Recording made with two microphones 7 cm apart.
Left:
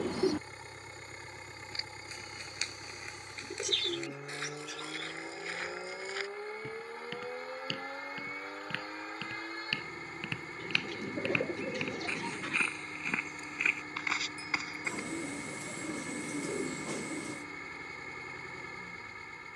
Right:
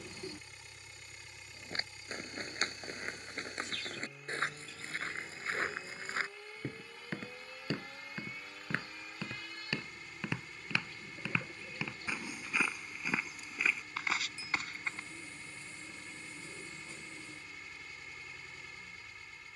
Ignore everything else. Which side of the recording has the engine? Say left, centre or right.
left.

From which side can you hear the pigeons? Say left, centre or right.
left.